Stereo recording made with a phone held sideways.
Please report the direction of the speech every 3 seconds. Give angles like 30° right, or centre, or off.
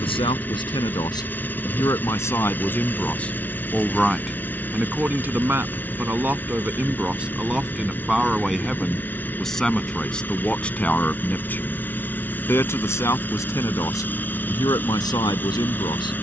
20° left, centre, 10° right, 10° left, 20° left, 30° left.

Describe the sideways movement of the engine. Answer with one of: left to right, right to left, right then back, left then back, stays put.
stays put.